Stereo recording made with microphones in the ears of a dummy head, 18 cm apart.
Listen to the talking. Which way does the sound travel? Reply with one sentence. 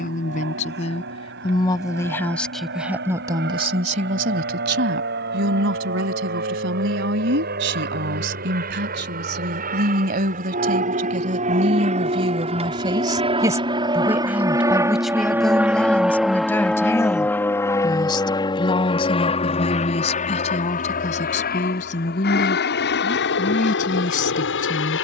You can hear the talking move from left to right and back again.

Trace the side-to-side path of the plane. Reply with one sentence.
In this clip you hear the plane move from right to left.